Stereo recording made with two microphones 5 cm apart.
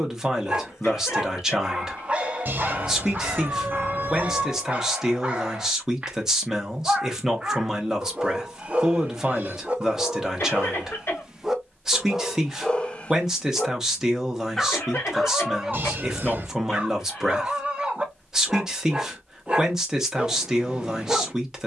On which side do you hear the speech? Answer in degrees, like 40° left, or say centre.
10° right.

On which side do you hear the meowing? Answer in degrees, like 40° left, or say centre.
40° right.